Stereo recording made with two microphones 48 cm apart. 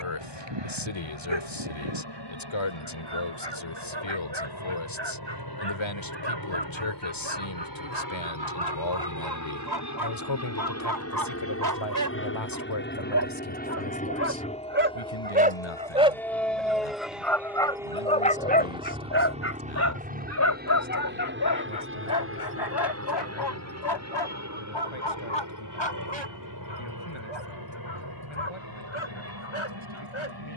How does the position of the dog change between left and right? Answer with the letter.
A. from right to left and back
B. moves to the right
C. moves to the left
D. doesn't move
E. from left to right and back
C.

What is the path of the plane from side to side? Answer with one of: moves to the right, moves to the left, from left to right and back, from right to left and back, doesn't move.
moves to the right.